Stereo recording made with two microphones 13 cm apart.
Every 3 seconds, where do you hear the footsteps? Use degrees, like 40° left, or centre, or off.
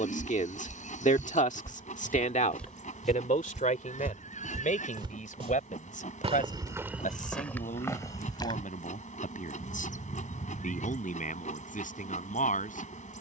20° left, 20° right, centre, off, off.